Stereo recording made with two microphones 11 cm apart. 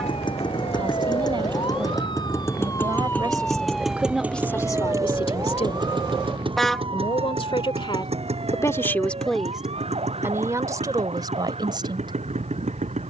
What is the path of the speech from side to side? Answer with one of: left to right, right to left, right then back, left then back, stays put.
left then back.